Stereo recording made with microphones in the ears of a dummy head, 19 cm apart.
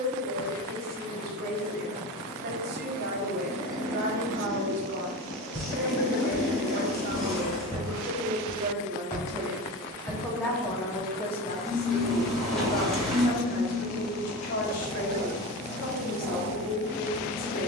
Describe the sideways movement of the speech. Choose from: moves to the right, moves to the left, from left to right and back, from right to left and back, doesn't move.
moves to the left.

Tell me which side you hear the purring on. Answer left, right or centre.
centre.